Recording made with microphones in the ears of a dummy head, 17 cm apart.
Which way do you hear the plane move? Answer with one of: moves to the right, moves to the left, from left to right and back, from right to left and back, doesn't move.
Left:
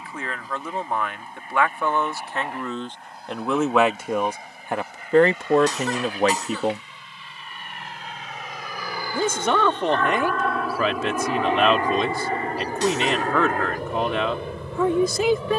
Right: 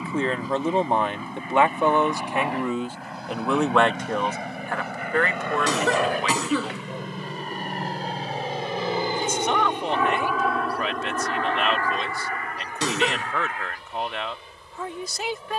moves to the left.